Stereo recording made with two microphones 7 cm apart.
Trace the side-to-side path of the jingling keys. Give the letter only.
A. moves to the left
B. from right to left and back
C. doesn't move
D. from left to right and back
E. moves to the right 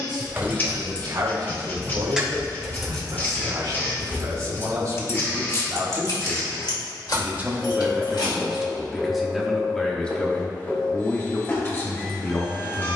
A.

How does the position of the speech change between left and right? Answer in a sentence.
You can hear the speech go from the right side to the left.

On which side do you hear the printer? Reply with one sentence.
In this clip you hear the printer on the left.